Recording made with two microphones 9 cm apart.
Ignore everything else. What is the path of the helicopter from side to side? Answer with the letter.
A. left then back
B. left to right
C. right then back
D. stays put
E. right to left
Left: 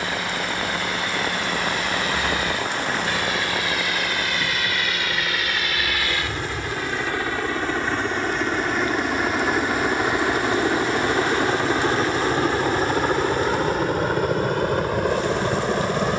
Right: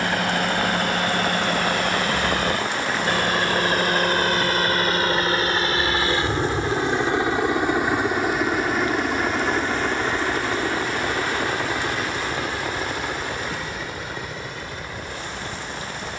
E.